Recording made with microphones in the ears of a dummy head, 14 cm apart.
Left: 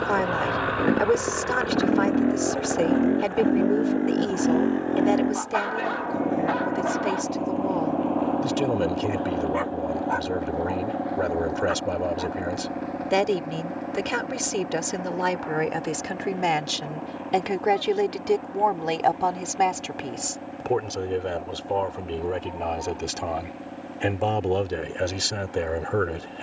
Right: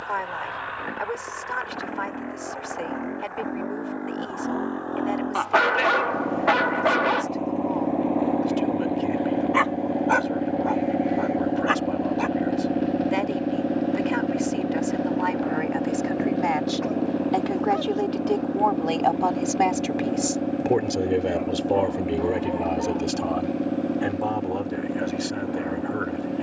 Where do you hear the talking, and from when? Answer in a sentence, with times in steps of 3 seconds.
In this clip you hear the talking on the left from 0 s, in the centre from 18 s and on the left from 24 s.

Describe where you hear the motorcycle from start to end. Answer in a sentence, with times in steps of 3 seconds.
In this clip you hear the motorcycle on the left from 0 s, in the centre from 6 s and on the right from 9 s.